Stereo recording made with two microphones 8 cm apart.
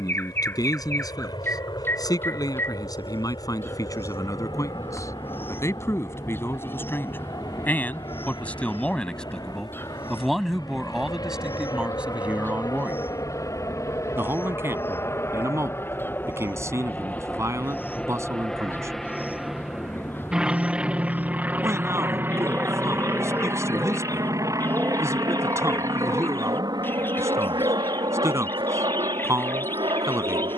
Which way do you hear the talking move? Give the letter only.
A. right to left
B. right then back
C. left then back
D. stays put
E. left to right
E.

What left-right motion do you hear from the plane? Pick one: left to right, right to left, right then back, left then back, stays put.
left to right.